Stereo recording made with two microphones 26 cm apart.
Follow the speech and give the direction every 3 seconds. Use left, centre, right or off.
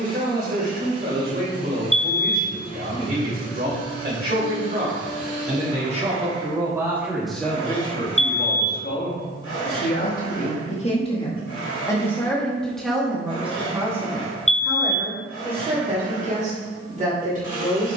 right, right, centre, left, centre, right.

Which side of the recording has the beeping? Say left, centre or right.
left.